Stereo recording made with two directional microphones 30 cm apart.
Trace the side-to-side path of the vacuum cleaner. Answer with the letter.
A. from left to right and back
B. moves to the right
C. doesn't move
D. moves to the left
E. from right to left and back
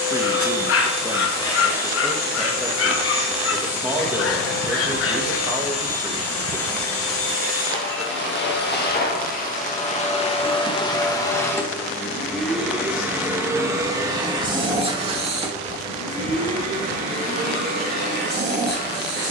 B.